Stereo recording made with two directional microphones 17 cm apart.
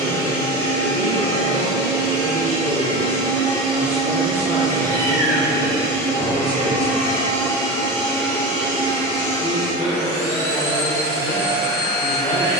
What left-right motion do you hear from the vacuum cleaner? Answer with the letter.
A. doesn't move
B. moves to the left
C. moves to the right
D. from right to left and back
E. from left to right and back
A.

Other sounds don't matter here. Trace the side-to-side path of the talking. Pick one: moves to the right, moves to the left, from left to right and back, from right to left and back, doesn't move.
moves to the left.